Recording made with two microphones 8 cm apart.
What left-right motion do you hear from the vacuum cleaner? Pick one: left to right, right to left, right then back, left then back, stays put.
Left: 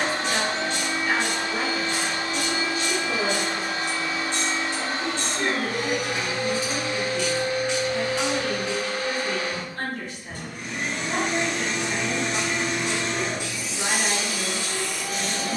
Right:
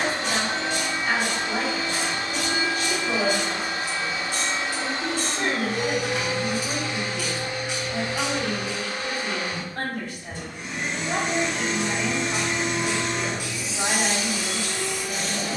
stays put.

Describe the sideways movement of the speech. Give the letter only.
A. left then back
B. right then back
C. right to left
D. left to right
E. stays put
E.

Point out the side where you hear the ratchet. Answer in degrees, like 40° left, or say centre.
10° right.